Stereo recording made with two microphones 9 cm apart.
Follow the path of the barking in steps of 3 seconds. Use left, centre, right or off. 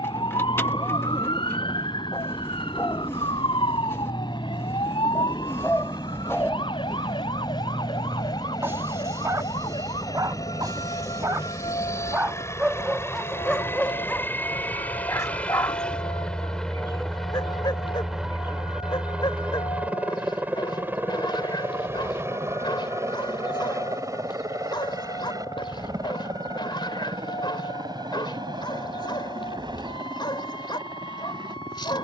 left, left, centre, right, centre, left, left, left, left, left, left.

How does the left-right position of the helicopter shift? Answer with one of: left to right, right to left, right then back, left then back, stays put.
left to right.